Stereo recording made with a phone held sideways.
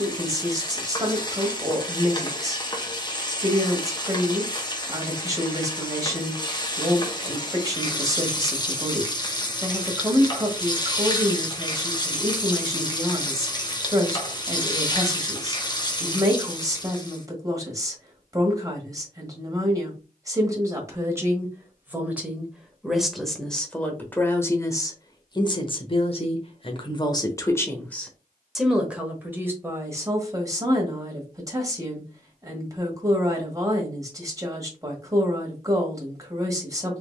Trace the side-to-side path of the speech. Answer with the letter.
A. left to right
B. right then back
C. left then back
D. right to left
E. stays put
C.